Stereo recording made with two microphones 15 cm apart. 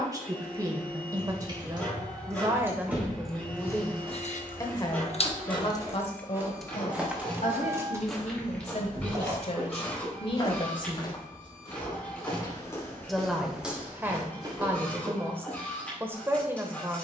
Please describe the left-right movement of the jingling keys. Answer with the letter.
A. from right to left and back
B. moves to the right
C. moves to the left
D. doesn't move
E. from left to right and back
A.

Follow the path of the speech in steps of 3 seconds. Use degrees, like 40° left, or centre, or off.
20° right, 20° left, 50° left, 40° left, 10° right, 20° right.